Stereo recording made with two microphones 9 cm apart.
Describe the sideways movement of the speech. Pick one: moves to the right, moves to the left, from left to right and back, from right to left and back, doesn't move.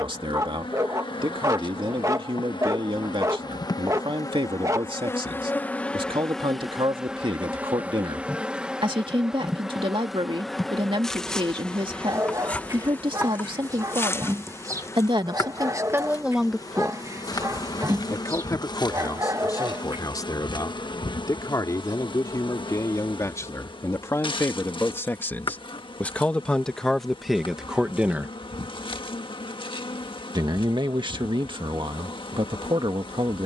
from right to left and back.